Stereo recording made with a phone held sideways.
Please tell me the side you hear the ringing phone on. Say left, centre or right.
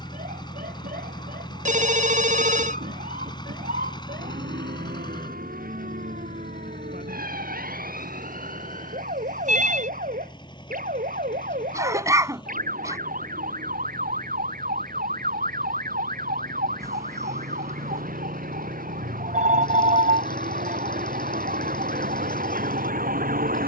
right.